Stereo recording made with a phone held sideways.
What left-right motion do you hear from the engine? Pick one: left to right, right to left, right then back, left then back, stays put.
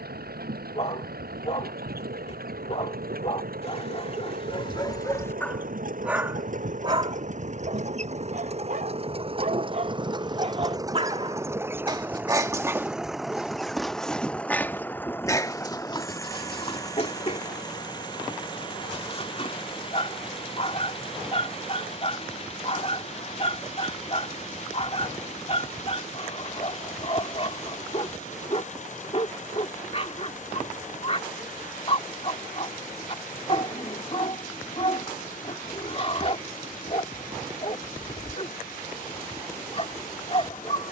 right to left.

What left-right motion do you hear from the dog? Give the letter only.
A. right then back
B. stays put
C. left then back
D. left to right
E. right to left
A.